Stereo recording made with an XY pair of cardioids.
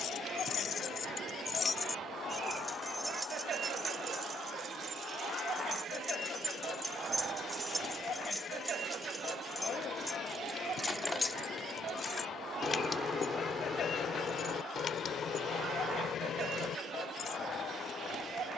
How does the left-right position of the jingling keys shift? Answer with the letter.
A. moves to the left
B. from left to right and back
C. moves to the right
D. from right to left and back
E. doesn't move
B.